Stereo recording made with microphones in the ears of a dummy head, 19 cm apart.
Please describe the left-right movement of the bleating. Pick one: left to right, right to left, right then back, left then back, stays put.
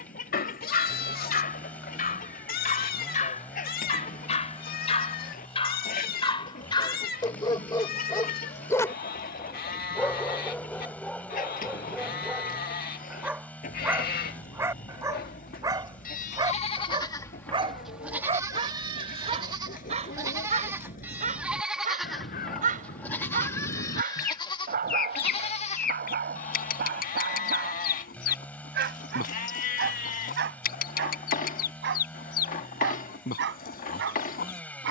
right then back.